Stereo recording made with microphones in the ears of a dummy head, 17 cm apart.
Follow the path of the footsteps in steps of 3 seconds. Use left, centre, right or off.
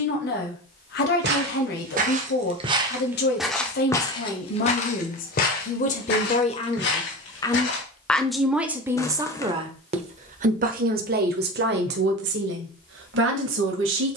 right, left, left, off, off.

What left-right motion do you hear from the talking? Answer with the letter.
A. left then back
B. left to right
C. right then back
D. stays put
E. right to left
B.